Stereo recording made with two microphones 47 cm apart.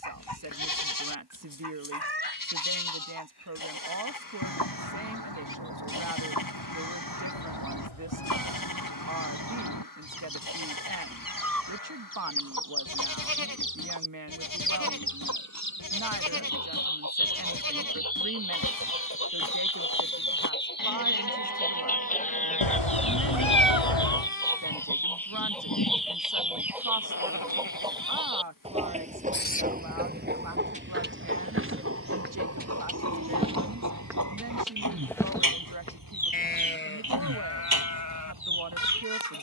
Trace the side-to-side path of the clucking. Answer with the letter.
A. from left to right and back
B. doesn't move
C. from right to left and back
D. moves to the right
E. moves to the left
D.